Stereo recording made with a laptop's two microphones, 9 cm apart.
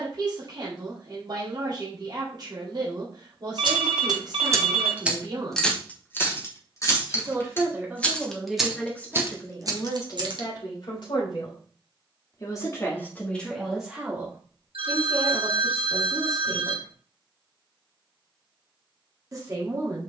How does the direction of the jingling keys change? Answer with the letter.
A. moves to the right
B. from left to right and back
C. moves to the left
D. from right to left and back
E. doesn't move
D.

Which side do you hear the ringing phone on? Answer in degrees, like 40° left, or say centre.
80° right.